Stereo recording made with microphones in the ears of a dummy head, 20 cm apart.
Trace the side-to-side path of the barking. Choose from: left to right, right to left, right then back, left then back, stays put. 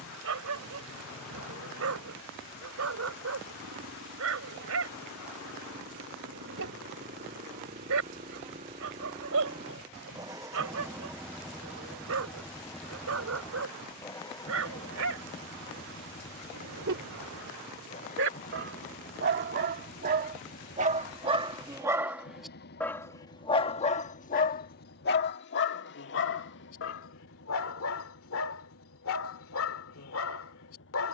right to left.